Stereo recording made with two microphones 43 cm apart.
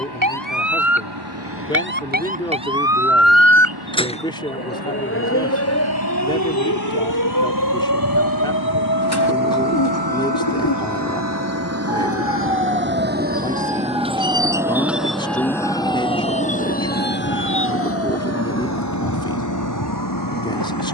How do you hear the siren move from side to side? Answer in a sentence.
In this clip you hear the siren move from right to left.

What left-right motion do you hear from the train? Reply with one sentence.
You can hear the train go from the right side to the left.